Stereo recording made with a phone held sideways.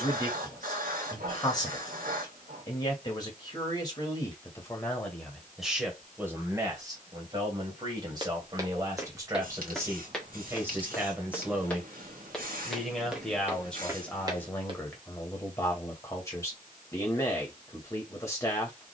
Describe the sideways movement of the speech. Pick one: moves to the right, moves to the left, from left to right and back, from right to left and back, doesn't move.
from left to right and back.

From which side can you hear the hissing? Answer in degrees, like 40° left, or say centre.
70° right.